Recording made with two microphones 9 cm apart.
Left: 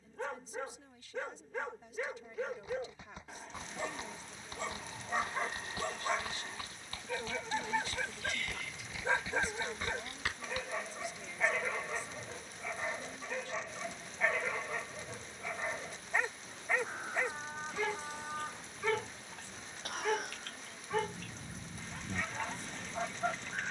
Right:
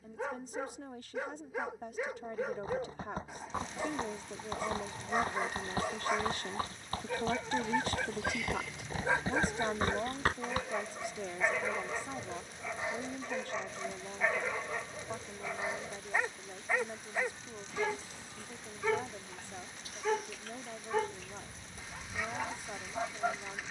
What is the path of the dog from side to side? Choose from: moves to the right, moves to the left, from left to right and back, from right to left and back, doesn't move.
doesn't move.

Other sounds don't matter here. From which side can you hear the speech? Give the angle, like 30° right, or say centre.
60° right.